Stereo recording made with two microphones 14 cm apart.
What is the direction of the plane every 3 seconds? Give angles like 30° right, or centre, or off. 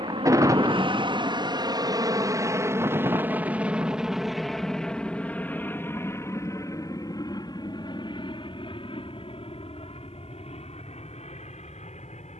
30° right, centre, 30° left, 40° left.